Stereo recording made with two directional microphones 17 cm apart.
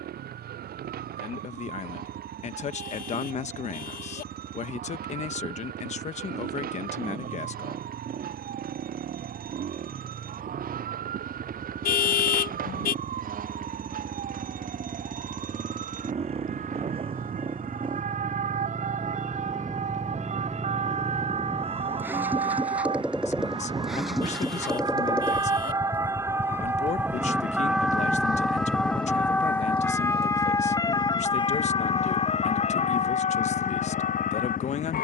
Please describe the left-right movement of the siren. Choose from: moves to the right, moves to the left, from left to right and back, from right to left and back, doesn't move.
moves to the left.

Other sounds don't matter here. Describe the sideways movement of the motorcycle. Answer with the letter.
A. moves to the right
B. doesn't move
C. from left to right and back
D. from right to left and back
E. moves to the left
E.